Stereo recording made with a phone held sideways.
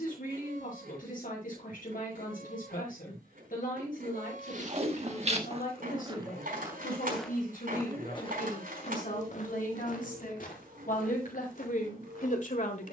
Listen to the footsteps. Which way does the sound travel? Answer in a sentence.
In this clip you hear the footsteps go from the right side to the left.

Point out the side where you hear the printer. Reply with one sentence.
You can hear the printer on the right.